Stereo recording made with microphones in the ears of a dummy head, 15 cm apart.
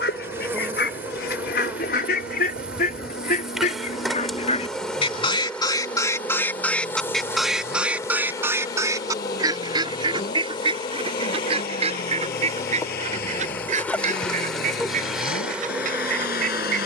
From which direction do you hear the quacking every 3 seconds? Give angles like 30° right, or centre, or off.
70° left, 40° left, centre, 30° right, 50° right, 50° right.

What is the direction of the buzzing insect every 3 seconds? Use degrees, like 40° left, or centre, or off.
10° right, centre, 20° left, 30° left, 10° left, 10° right.